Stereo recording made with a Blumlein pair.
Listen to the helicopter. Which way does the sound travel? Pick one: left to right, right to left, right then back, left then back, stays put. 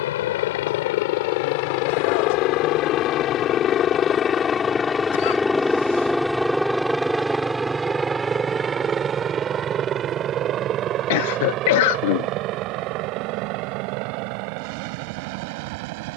left to right.